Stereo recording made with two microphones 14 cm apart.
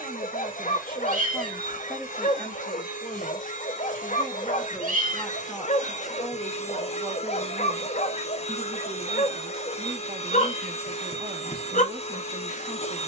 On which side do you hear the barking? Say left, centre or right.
left.